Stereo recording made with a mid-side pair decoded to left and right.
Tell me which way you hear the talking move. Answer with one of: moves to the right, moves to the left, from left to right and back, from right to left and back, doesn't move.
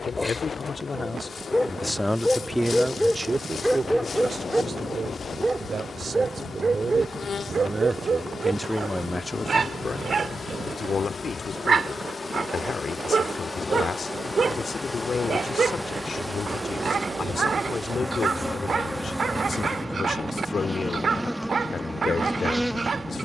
from left to right and back.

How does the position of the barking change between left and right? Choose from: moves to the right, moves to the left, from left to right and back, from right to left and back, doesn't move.
moves to the right.